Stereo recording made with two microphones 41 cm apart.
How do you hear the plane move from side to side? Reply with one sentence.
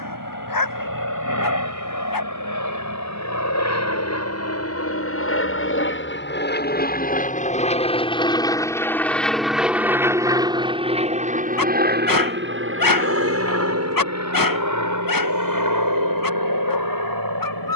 In this clip you hear the plane go from the left side to the right.